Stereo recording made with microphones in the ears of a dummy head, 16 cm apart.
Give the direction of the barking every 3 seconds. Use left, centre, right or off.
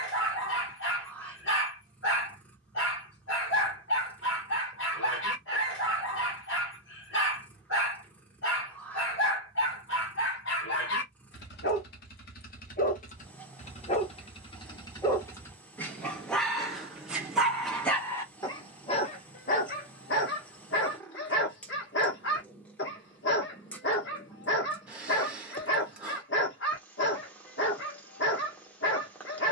left, left, left, left, left, centre, left, left, left, left.